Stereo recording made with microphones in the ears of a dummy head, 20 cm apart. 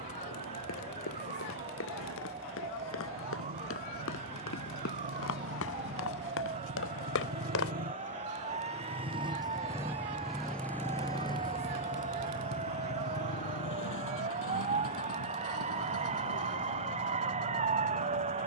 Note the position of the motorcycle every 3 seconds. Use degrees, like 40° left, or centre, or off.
70° right, 60° right, 40° right, centre, 50° left, 70° left.